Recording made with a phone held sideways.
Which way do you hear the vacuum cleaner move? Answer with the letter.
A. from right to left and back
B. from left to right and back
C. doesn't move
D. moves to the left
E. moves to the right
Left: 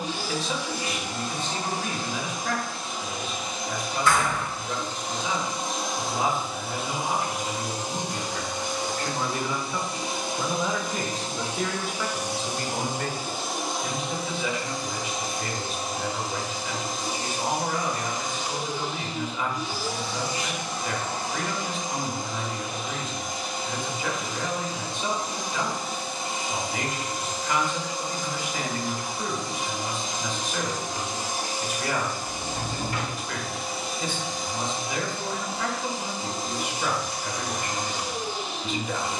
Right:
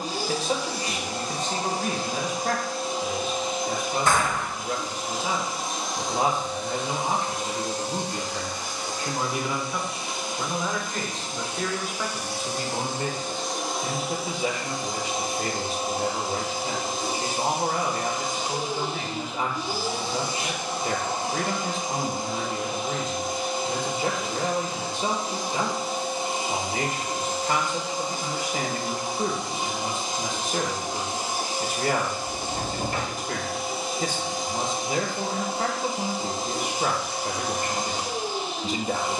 A.